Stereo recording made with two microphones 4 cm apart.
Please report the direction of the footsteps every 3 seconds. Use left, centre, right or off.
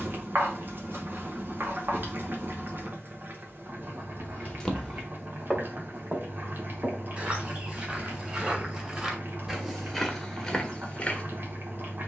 off, centre, right, centre.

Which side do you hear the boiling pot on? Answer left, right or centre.
right.